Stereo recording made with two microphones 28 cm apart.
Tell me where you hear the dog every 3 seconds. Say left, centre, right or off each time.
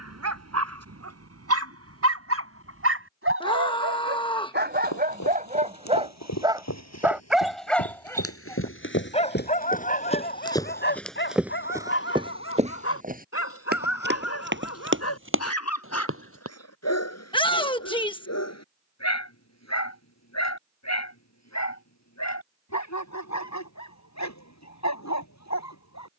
right, right, centre, left, left, left, left, left, left.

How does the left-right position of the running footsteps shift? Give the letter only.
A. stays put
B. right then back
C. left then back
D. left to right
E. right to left
D.